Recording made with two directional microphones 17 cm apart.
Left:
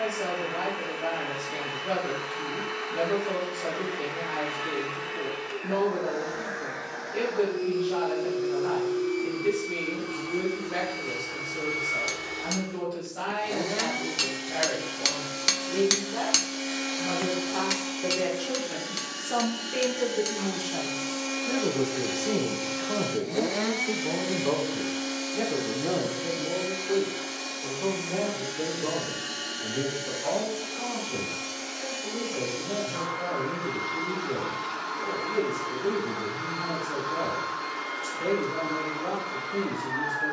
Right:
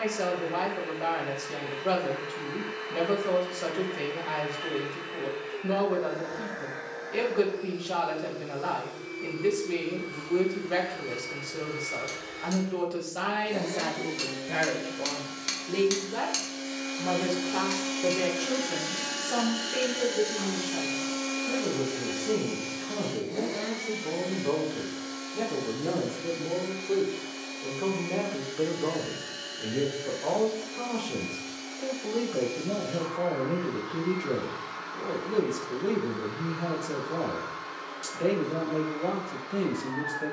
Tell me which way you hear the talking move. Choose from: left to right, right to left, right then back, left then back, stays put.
left then back.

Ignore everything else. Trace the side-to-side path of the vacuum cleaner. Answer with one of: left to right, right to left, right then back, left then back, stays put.
right then back.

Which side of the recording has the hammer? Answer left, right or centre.
left.